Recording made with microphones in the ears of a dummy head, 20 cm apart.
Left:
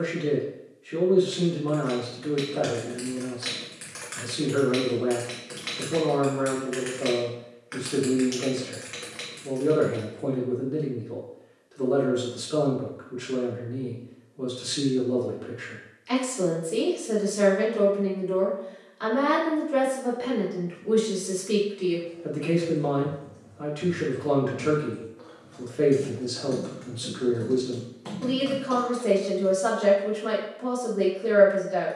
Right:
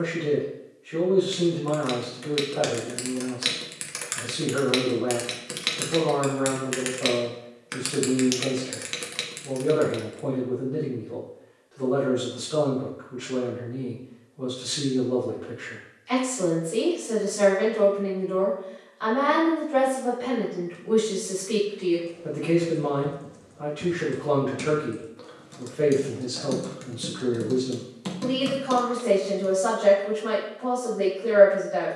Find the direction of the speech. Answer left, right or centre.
left.